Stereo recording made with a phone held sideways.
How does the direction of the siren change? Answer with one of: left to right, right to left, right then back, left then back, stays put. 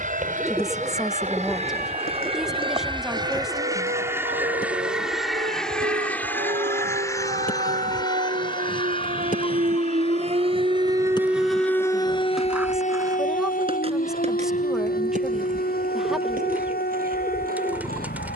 right to left.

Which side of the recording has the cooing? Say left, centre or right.
centre.